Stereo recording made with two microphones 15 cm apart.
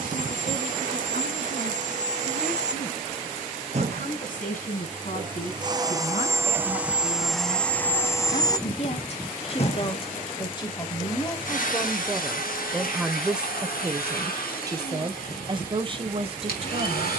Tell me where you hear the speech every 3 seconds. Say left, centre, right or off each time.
left, left, left, left, centre, right.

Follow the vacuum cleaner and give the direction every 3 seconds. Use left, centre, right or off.
right, right, centre, left, left, left.